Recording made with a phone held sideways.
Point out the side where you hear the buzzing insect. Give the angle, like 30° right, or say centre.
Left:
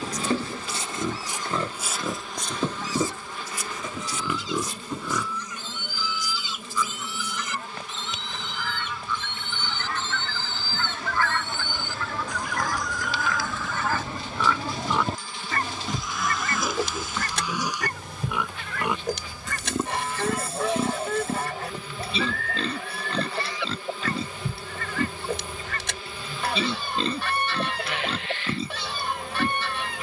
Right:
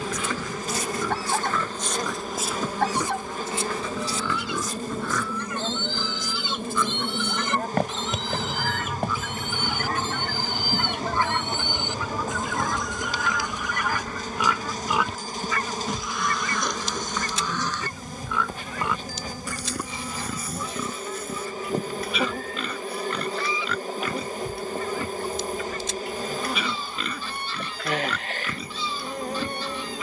40° right.